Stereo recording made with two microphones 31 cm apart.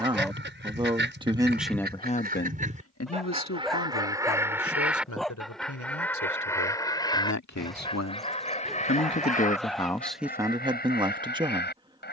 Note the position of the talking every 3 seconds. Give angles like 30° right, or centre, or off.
centre, 70° left, 70° left, centre.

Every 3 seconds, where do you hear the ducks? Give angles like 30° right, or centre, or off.
40° right, 10° right, 20° left, 30° left.